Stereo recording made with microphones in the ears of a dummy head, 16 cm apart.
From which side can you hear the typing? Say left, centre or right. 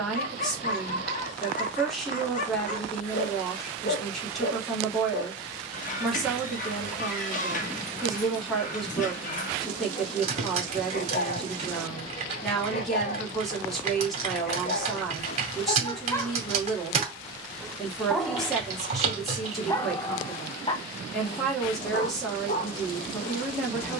right.